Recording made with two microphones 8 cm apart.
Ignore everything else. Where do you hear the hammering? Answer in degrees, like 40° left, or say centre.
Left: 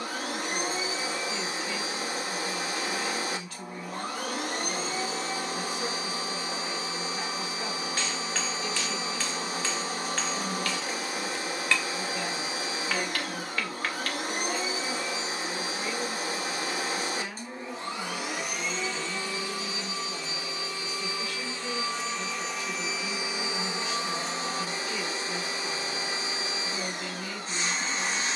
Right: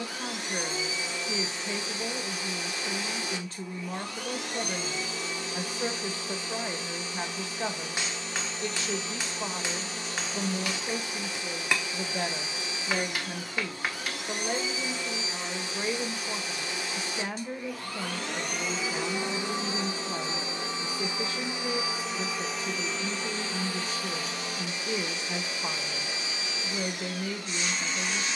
20° right.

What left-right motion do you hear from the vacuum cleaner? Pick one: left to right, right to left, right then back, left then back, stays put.
right then back.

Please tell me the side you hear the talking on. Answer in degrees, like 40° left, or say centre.
30° right.